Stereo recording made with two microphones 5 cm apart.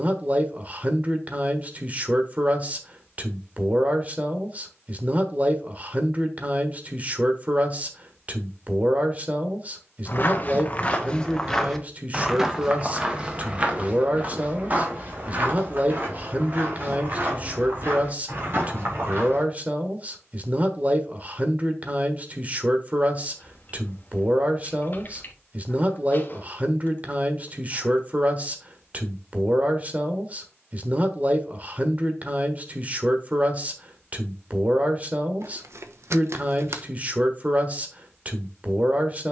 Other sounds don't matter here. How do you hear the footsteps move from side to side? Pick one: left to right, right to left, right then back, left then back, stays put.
left to right.